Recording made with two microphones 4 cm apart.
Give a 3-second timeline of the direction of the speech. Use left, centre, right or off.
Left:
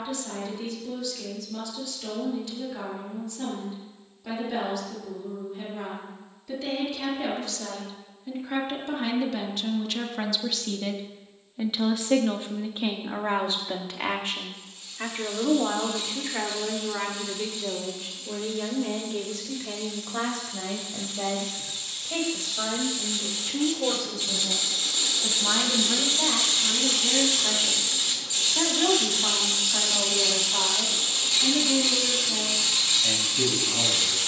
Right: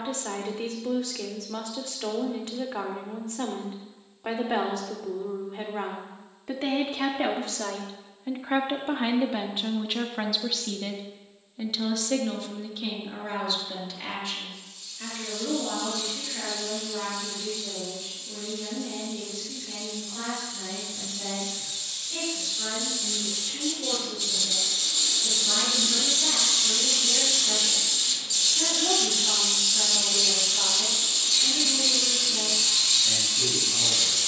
right, right, right, centre, left, left, left, left, left, left, left, left.